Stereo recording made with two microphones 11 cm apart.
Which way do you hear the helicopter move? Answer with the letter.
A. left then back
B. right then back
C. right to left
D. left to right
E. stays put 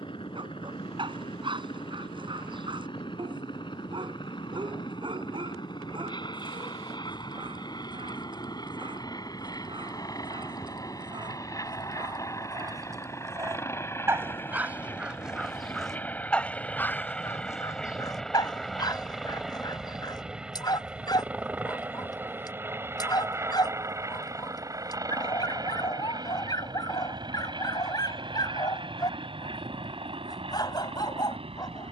D.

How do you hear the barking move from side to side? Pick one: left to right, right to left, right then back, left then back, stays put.
right to left.